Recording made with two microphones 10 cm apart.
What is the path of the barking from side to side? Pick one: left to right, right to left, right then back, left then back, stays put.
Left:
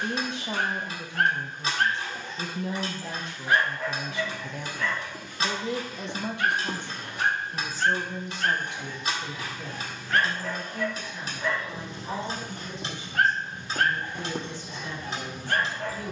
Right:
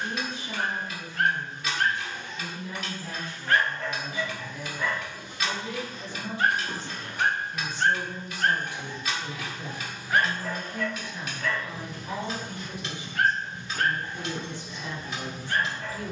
right then back.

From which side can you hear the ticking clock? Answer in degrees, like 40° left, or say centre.
30° left.